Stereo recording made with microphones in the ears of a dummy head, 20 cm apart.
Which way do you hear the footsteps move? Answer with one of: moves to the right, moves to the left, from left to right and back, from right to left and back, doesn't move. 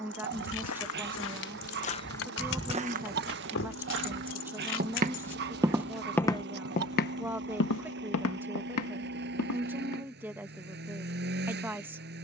from left to right and back.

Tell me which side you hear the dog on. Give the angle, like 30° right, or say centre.
50° right.